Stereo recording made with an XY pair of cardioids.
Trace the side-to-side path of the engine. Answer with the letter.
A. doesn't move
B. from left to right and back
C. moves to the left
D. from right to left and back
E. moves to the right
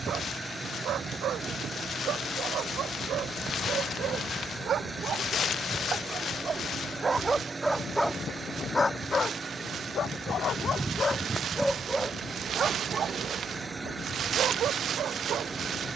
A.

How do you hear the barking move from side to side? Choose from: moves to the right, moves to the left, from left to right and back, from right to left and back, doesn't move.
from right to left and back.